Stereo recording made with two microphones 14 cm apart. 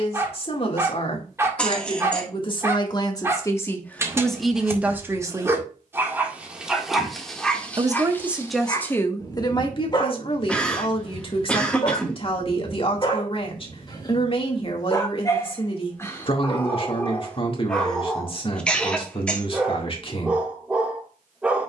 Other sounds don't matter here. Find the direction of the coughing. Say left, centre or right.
centre.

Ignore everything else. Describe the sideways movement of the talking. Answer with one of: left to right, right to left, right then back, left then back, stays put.
right then back.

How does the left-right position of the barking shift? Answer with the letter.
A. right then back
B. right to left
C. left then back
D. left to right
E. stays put
C.